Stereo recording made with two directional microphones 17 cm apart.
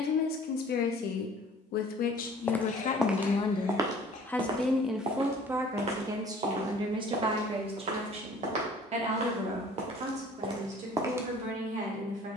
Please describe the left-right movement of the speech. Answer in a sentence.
In this clip you hear the speech travel towards the right.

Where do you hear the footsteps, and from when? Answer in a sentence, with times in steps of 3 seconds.
You can hear the footsteps in the centre from 0 s and on the right from 3 s.